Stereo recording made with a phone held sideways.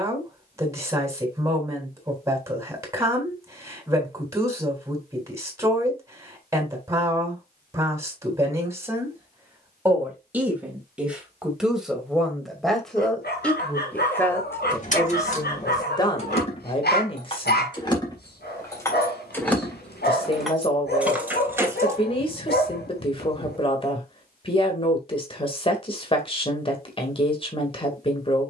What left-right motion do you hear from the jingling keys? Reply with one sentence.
You can hear the jingling keys travel towards the right.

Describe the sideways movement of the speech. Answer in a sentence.
In this clip you hear the speech travel towards the left.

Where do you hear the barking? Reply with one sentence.
You can hear the barking on the left.